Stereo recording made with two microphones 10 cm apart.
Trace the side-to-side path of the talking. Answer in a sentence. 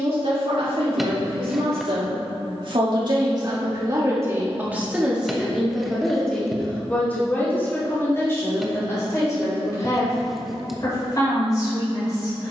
In this clip you hear the talking travel towards the left.